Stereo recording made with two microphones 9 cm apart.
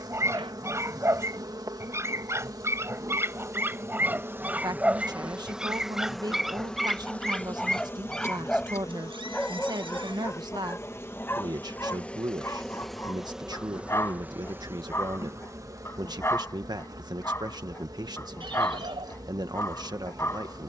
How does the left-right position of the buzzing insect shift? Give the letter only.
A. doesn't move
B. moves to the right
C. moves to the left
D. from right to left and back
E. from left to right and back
D.